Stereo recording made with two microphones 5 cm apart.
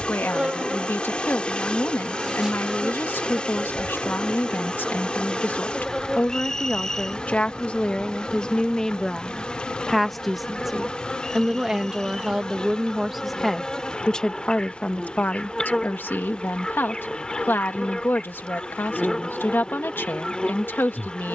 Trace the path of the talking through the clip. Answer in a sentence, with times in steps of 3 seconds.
In this clip you hear the talking on the left from 0 s, in the centre from 9 s and on the left from 15 s.